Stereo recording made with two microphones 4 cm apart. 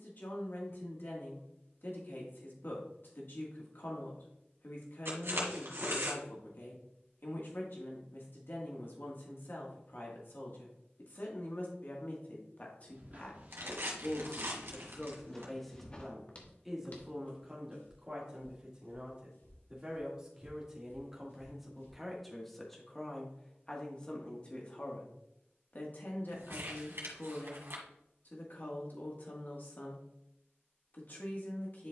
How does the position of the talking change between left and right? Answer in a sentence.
In this clip you hear the talking move from left to right and back again.